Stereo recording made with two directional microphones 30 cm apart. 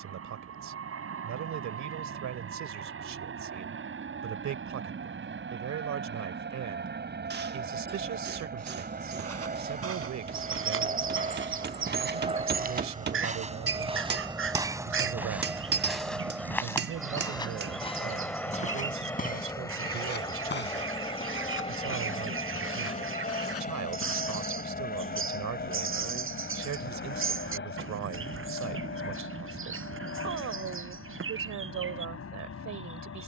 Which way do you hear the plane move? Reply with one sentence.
In this clip you hear the plane move to the left.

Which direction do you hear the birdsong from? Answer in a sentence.
In this clip you hear the birdsong on the right.